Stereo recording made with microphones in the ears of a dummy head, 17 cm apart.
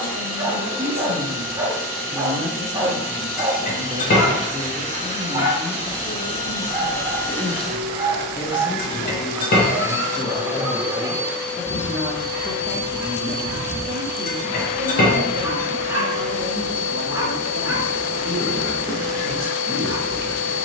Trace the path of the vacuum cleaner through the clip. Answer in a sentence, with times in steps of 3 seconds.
In this clip you hear the vacuum cleaner on the left from 0 s, in the centre from 6 s and on the left from 12 s.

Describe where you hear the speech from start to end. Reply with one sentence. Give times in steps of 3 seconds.
You can hear the speech on the right from 0 s, in the centre from 3 s, on the left from 6 s, in the centre from 9 s and on the right from 12 s.